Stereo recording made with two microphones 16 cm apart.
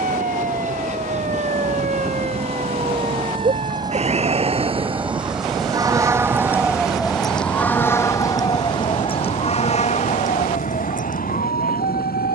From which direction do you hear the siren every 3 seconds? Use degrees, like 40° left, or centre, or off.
60° right, 40° right, 10° left, 50° left.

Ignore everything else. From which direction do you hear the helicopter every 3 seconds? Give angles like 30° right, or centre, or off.
50° right, 20° right, 30° left, 60° left.